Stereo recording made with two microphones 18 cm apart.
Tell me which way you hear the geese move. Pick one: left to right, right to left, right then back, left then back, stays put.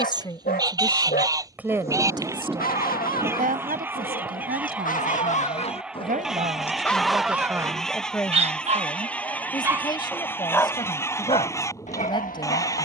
right to left.